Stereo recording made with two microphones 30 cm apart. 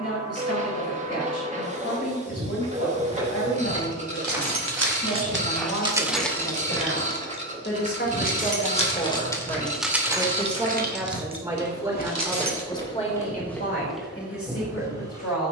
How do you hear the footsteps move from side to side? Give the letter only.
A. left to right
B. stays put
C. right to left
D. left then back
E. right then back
D.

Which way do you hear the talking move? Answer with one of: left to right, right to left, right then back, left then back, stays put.
right then back.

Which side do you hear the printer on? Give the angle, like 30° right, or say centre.
20° right.